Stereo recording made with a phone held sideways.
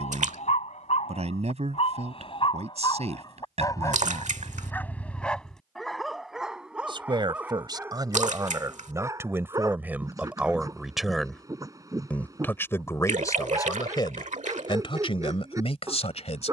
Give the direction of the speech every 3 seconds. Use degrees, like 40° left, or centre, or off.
50° right, 50° right, 30° right, 10° right, 20° left, 40° left.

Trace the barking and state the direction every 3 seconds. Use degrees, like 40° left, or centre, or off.
50° left, 20° left, 10° right, 20° right, 20° right, 20° right.